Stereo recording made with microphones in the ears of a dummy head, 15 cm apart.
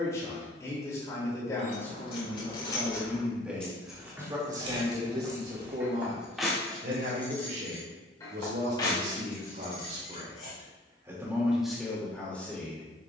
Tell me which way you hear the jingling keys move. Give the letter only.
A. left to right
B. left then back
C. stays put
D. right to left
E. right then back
E.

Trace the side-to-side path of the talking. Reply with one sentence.
In this clip you hear the talking move from left to right and back again.